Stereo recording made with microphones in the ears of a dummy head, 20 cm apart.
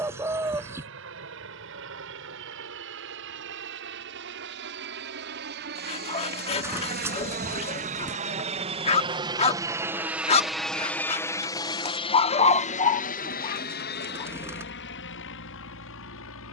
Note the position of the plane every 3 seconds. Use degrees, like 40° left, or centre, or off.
70° right, 60° right, 40° right, centre, 40° left, 60° left.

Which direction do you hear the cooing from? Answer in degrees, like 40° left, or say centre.
10° right.